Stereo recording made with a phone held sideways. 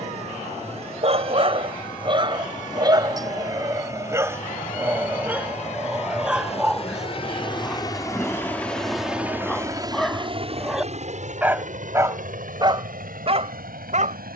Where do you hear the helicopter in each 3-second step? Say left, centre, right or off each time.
left, left, left, right, right.